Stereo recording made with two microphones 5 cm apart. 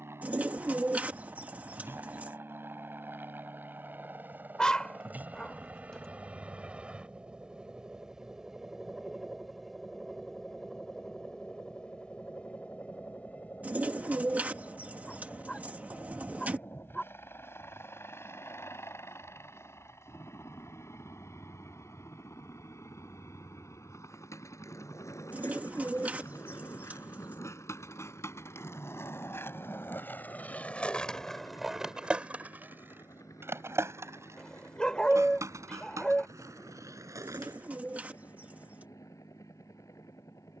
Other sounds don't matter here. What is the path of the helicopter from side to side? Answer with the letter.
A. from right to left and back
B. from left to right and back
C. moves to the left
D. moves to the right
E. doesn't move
C.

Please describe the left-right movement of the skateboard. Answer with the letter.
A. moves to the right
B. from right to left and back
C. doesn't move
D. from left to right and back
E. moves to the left
A.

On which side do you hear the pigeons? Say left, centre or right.
right.